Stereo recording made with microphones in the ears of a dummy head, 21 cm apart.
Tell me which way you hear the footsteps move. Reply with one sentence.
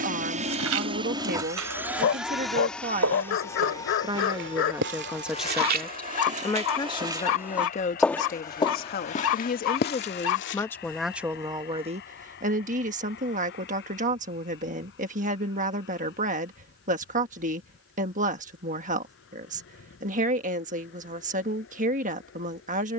In this clip you hear the footsteps travel towards the left.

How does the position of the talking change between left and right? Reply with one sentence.
In this clip you hear the talking move from right to left and back again.